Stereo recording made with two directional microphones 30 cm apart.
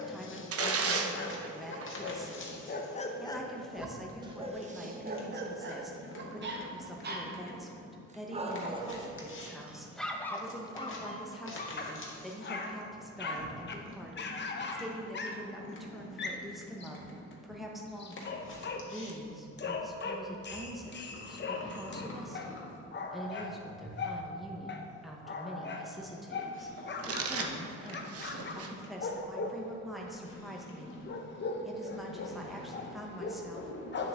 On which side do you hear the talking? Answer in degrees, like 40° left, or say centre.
centre.